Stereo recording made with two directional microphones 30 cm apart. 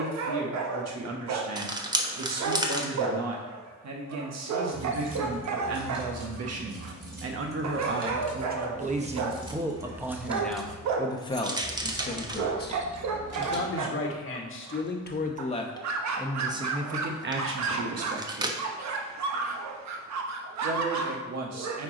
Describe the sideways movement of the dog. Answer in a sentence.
In this clip you hear the dog stay put.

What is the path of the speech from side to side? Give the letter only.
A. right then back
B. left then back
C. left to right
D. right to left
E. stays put
B.